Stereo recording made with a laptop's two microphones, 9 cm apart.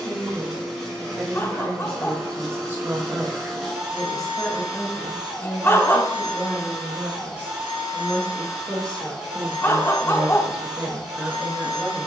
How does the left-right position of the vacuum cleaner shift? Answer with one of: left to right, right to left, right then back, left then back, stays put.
stays put.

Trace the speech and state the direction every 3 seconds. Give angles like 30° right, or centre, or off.
30° right, 10° left, 20° left, 10° right.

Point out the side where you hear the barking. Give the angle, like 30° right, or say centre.
30° left.